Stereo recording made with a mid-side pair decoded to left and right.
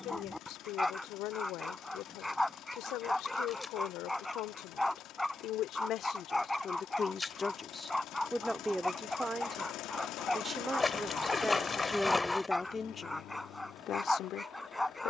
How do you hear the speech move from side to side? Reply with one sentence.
In this clip you hear the speech go right and come back.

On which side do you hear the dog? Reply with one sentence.
In this clip you hear the dog in the centre.